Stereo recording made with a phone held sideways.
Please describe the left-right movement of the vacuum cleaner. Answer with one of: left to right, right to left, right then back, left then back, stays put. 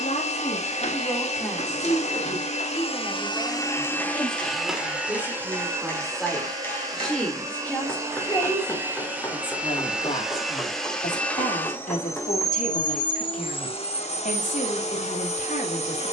right then back.